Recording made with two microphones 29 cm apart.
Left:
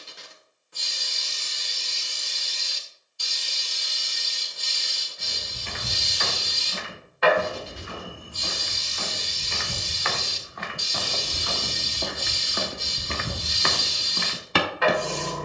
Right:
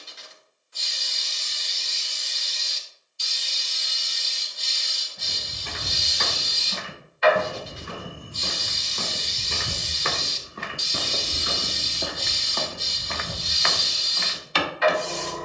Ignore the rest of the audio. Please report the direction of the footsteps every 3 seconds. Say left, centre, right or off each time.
off, right, right, right, left.